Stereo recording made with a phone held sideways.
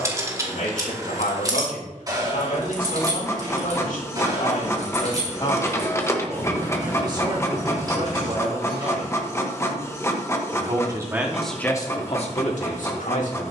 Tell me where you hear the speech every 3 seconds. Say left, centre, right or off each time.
left, left, right, centre, left.